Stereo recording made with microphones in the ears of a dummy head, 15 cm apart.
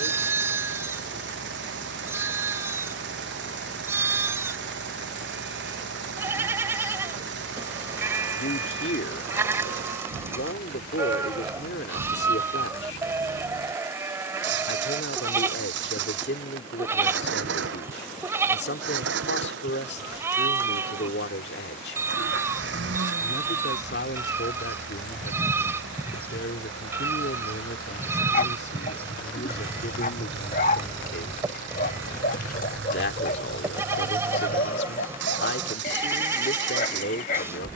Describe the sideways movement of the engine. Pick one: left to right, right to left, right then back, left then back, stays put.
stays put.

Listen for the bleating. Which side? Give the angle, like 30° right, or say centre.
20° right.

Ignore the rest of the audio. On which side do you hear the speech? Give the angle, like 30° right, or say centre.
70° left.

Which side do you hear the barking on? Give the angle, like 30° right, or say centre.
50° left.